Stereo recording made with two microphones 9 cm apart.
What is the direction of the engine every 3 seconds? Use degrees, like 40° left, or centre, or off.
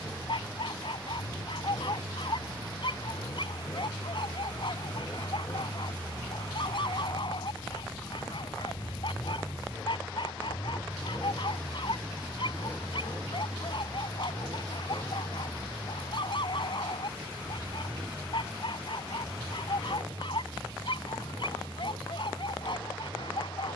40° left, 30° left, 10° left, 10° right, 30° right, 40° right, 50° right, 60° right.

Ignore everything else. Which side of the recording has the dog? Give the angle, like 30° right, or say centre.
60° left.